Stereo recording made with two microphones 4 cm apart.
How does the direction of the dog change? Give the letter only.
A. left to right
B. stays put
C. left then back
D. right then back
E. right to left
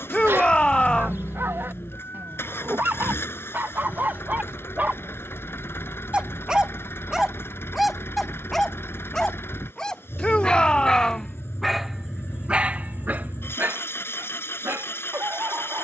C.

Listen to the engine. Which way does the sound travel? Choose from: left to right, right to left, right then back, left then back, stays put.
stays put.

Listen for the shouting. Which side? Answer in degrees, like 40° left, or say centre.
20° left.